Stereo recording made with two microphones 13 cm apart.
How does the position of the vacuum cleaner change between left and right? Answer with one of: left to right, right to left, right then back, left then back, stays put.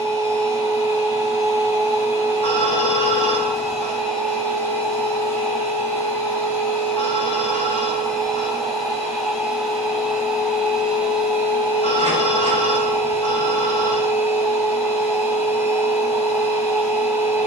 left then back.